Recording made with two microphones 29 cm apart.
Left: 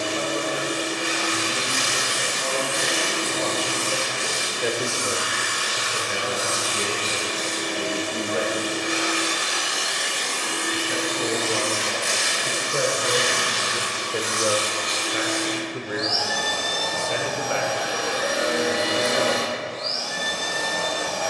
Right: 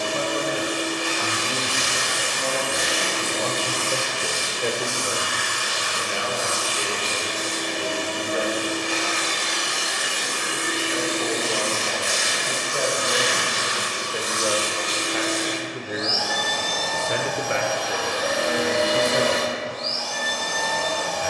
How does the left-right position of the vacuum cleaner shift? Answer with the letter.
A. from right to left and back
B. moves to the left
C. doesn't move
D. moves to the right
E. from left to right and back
E.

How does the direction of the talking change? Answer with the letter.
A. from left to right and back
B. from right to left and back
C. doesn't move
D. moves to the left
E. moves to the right
B.